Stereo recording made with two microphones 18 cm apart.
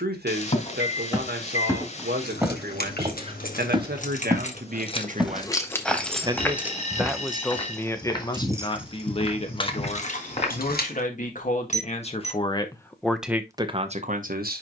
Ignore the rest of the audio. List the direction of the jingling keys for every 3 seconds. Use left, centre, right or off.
left, left, centre, left, off.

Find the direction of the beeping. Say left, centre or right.
left.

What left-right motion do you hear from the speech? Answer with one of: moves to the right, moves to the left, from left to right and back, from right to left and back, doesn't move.
from right to left and back.